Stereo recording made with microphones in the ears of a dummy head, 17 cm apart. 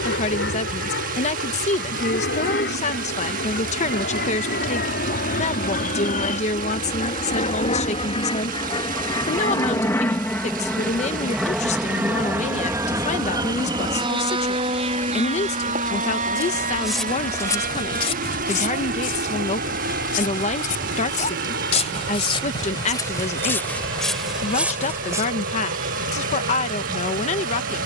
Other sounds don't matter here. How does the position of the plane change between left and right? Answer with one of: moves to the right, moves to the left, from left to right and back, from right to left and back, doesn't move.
moves to the right.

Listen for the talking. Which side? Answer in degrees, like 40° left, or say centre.
40° left.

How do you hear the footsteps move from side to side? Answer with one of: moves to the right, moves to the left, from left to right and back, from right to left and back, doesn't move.
from right to left and back.